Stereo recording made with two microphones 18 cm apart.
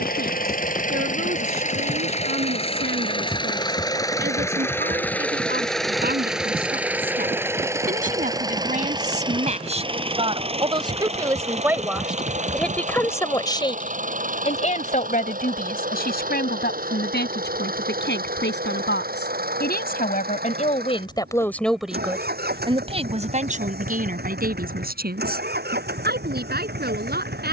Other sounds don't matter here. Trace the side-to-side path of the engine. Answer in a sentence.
In this clip you hear the engine travel towards the right.